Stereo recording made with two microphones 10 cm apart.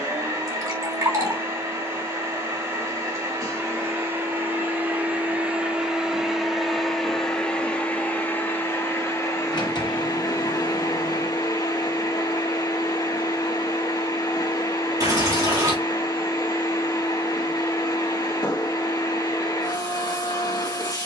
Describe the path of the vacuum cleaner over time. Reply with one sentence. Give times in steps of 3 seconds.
You can hear the vacuum cleaner on the right from 0 s, in the centre from 6 s and on the left from 9 s.